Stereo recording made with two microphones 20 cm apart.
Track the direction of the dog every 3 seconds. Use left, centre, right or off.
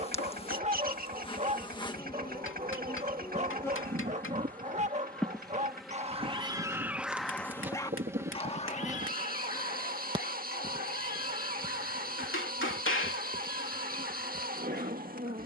right, right, centre, left, left.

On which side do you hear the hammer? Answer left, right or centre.
left.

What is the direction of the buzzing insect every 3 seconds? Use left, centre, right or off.
left, centre, centre, right, right.